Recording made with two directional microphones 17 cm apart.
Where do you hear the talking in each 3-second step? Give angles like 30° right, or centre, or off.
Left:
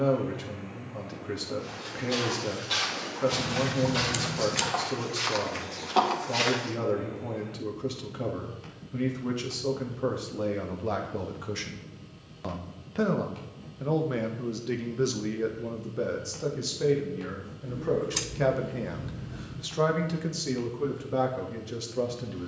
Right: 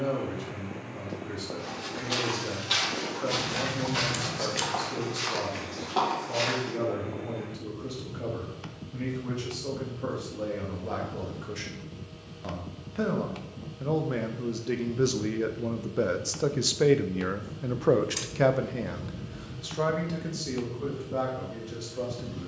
30° left, 30° left, 30° left, 30° left, 10° left, 30° right, 10° left, 30° left.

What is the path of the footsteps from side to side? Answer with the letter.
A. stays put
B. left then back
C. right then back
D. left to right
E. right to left
E.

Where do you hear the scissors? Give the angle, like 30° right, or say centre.
20° left.